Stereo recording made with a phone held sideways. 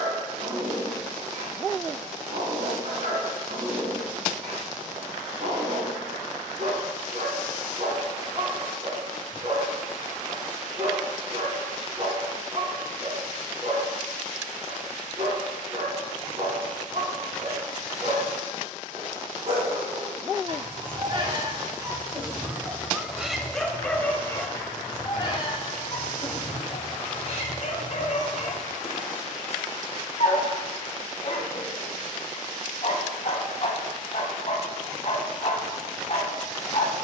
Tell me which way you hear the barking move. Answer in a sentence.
You can hear the barking move to the left.